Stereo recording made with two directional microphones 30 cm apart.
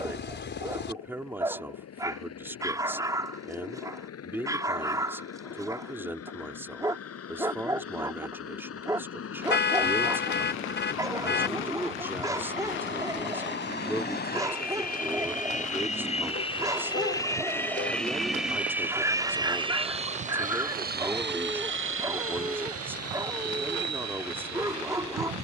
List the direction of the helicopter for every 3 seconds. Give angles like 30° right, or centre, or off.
60° left, 60° left, 50° left, 50° left, 40° left, 20° left, 10° right, 50° right, 60° right.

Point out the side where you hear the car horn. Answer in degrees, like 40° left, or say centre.
40° left.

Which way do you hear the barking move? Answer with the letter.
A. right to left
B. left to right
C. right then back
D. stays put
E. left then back
D.